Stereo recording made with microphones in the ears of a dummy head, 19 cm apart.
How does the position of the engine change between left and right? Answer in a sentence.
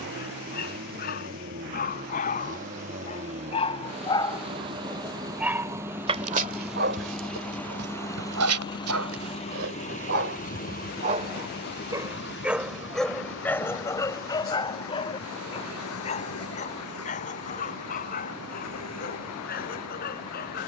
In this clip you hear the engine travel towards the left.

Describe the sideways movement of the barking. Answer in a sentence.
In this clip you hear the barking go right and come back.